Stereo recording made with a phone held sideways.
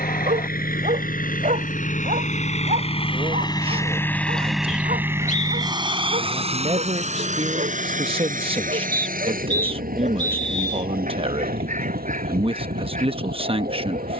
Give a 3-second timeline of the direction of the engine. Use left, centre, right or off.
left, centre, right, right, right.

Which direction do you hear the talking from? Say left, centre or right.
right.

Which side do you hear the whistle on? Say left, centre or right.
left.